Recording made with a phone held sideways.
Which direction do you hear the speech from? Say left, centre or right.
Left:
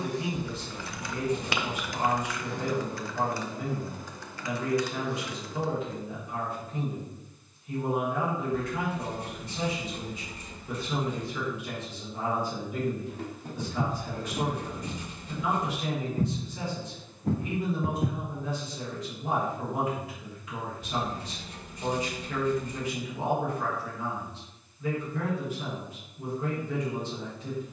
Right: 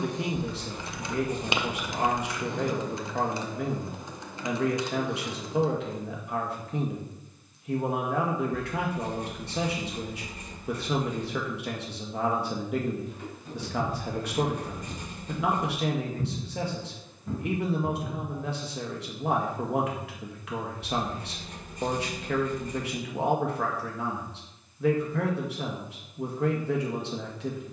right.